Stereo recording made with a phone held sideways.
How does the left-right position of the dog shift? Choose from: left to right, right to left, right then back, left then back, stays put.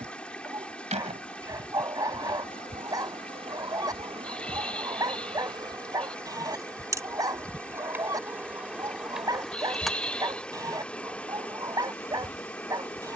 stays put.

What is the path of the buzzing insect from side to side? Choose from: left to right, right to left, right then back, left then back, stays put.
right to left.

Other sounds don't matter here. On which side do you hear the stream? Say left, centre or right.
centre.